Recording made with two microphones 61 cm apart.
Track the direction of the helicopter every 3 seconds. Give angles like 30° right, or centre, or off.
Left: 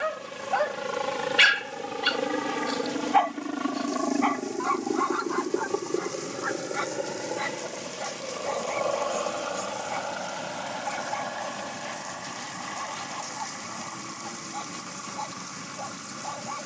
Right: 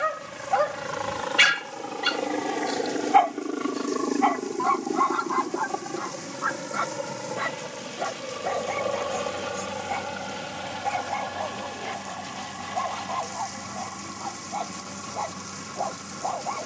50° left, 10° left, 30° right, 50° right, 60° right, 60° right.